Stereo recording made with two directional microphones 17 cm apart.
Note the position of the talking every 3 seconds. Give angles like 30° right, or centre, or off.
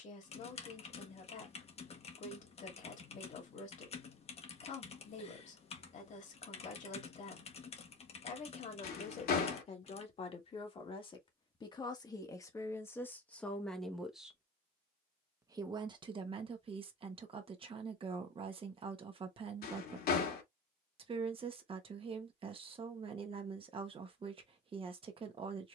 50° left, 50° left, 50° left, 30° left, 10° left, 30° right, 30° right, 30° right, 30° right.